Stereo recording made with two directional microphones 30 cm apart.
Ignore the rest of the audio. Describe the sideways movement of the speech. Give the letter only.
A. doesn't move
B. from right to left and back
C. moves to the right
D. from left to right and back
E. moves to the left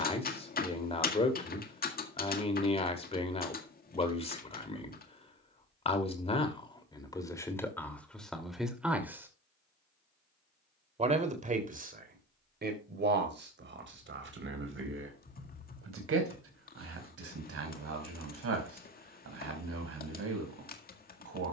C.